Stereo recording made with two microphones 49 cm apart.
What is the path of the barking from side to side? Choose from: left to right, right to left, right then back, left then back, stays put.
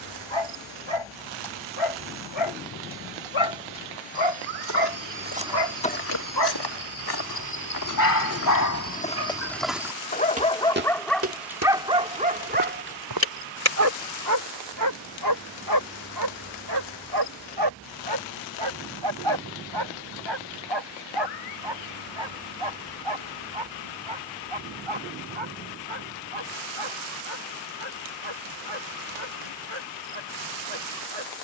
left to right.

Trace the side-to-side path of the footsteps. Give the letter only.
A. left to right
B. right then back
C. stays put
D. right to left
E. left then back
E.